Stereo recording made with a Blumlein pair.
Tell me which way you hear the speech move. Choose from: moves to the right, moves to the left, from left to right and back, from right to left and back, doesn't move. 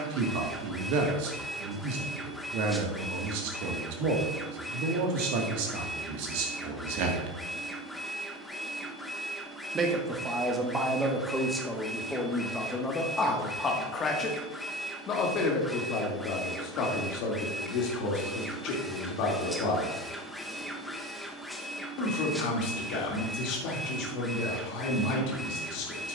moves to the left.